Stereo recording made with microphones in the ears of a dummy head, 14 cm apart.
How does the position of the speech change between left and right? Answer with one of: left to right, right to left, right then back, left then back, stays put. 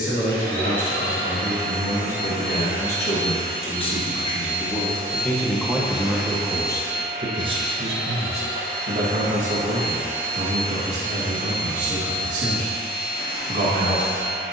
left to right.